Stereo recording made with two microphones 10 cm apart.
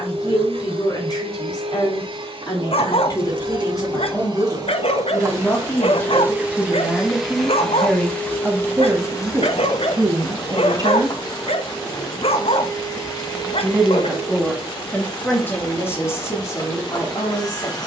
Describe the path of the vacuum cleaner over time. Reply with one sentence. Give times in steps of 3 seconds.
In this clip you hear the vacuum cleaner on the right from 0 s, in the centre from 6 s and on the left from 9 s.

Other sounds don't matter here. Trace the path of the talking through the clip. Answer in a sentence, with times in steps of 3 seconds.
In this clip you hear the talking on the left from 0 s, in the centre from 6 s, on the right from 9 s, in the centre from 12 s and on the left from 15 s.